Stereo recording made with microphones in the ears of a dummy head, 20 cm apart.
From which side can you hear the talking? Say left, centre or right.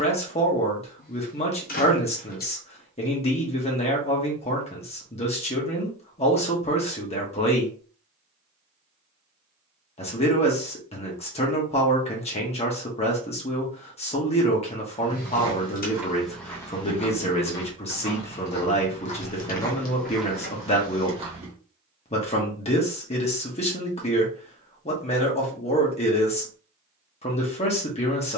left.